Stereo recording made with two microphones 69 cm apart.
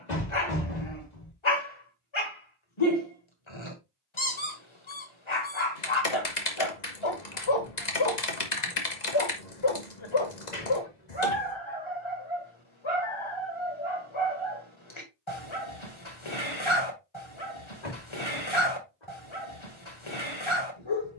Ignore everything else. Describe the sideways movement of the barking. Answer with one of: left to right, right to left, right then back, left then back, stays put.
stays put.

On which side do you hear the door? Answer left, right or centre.
left.